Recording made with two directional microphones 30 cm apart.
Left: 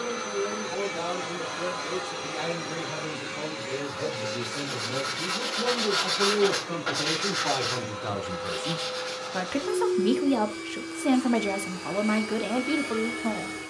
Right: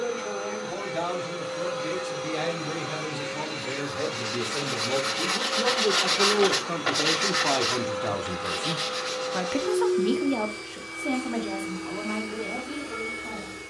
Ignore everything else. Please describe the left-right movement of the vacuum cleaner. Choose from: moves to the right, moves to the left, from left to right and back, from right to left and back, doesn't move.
from left to right and back.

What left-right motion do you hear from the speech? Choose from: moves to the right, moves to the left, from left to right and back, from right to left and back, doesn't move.
moves to the left.